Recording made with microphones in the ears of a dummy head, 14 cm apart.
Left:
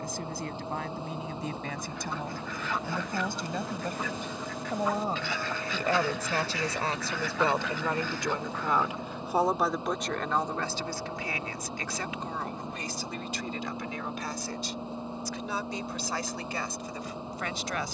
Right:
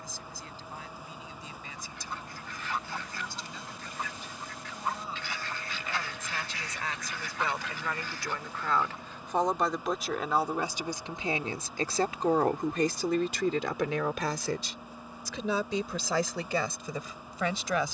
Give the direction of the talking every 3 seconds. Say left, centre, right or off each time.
left, left, left, centre, right, right.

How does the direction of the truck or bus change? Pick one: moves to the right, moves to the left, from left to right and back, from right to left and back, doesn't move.
doesn't move.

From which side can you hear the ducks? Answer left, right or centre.
left.